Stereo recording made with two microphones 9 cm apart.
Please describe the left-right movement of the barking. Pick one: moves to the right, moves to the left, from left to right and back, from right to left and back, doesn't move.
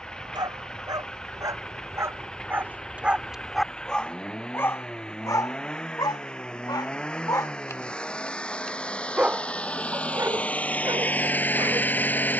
from right to left and back.